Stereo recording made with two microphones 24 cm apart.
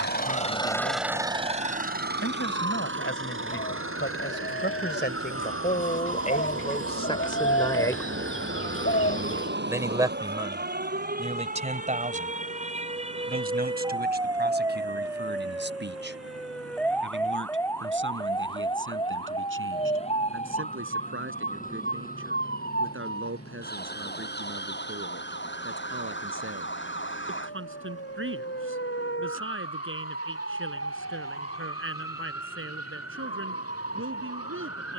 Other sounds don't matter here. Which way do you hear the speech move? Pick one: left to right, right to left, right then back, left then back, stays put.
left to right.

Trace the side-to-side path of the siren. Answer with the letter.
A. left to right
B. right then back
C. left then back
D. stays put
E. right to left
E.